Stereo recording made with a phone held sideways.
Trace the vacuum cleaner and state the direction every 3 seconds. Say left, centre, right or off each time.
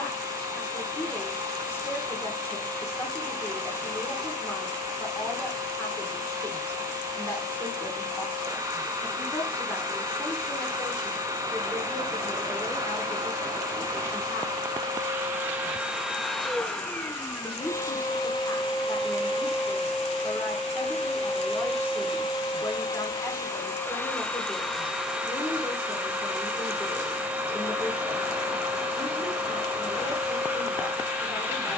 right, right, right, right, right, centre, left, left, centre, centre, centre.